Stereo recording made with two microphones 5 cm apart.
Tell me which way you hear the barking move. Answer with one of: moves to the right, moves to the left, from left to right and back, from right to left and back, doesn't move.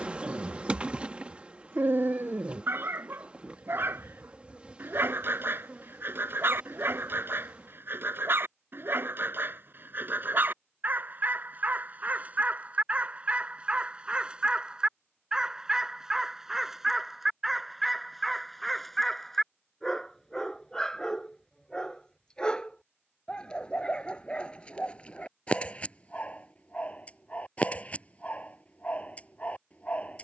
moves to the left.